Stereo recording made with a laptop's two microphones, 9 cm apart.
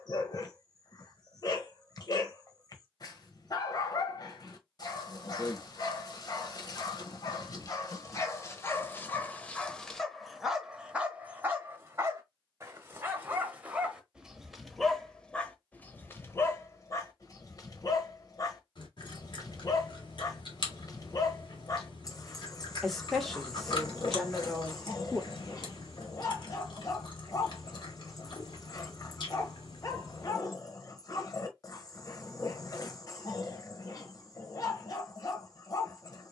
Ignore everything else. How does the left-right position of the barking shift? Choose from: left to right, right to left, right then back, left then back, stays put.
right then back.